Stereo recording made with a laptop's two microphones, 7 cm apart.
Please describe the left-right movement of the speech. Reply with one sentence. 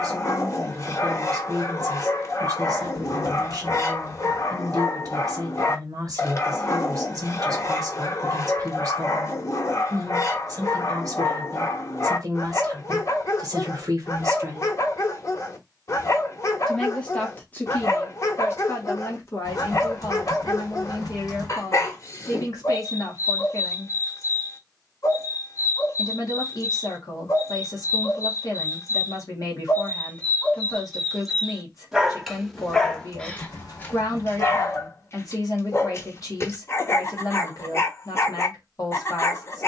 You can hear the speech travel towards the left.